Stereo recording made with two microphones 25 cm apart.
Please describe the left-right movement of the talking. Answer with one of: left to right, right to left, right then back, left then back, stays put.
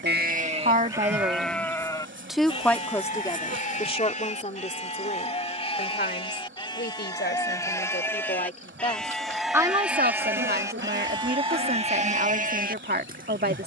left then back.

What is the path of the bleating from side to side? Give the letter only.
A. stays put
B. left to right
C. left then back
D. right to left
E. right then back
C.